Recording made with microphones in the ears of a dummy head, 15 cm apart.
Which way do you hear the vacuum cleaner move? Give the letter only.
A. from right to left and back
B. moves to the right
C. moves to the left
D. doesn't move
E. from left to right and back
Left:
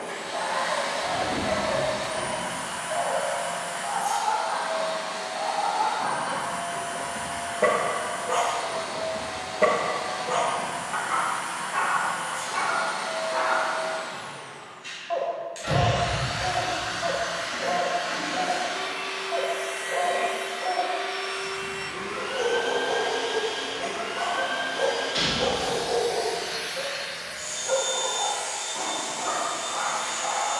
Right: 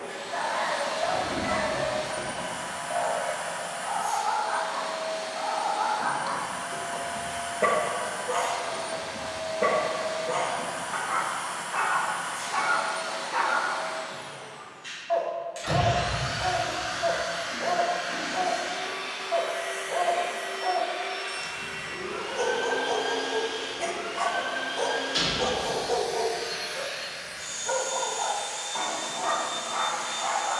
E.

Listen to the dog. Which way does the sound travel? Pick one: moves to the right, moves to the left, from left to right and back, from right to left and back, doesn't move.
from right to left and back.